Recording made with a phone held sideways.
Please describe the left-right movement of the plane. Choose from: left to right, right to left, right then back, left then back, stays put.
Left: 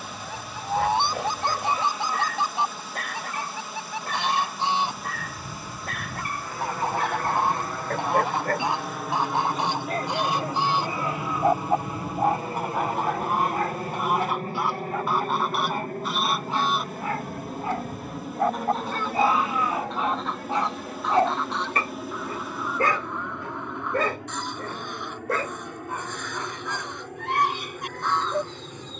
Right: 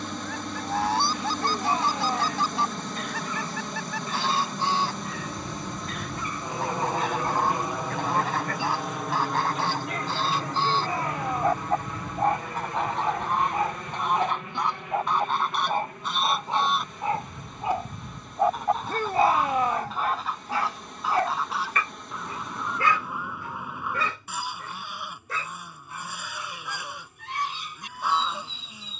right to left.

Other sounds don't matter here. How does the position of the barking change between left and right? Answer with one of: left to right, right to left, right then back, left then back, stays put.
right then back.